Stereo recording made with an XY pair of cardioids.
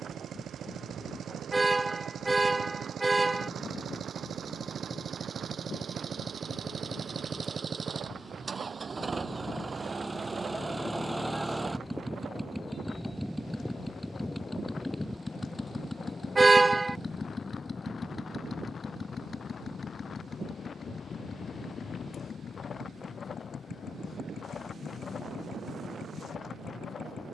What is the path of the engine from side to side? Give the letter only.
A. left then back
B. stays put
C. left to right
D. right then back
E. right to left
E.